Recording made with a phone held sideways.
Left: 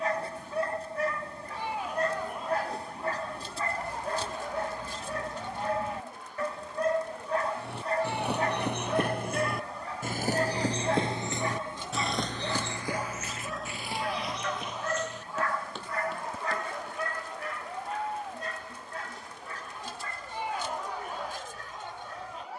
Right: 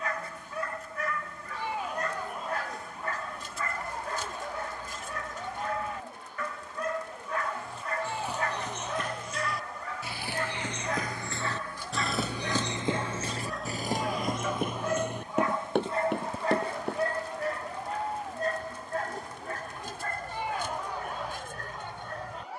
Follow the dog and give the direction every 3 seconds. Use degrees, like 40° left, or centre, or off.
30° left, 30° left, 30° left, 30° left, centre, 30° right, 50° right, 60° right.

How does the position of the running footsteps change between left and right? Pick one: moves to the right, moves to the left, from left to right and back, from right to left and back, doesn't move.
moves to the right.